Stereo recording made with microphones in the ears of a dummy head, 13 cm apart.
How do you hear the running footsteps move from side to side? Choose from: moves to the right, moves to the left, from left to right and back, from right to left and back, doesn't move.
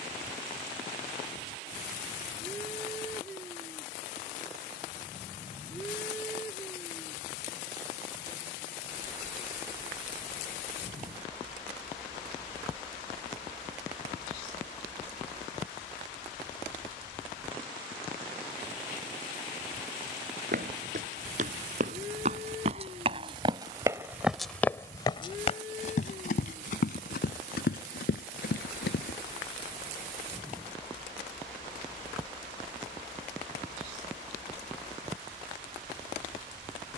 moves to the left.